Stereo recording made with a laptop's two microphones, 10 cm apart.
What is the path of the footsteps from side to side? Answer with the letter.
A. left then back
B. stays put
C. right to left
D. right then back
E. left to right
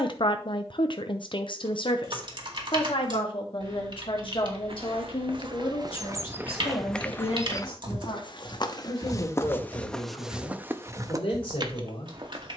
A.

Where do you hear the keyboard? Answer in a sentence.
In this clip you hear the keyboard on the right.